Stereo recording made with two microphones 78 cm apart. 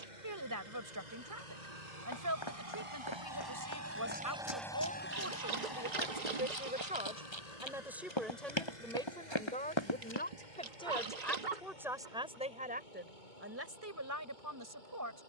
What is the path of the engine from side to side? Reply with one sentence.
In this clip you hear the engine move from right to left.